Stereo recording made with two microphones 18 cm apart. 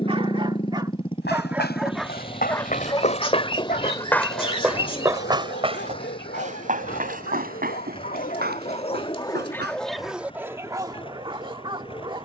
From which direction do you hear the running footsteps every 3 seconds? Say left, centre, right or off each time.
left, centre, right, right.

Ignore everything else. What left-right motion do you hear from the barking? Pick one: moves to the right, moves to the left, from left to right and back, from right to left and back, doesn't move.
from right to left and back.